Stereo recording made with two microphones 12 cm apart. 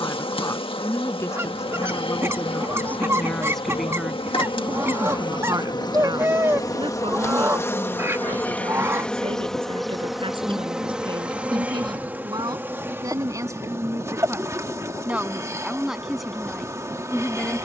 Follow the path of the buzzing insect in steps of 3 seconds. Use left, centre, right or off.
left, left, left, centre, right, right.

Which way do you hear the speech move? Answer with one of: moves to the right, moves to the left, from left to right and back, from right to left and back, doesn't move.
from left to right and back.